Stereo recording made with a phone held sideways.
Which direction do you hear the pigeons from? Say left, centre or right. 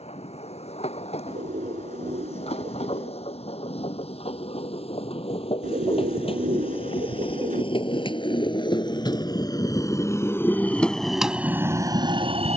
right.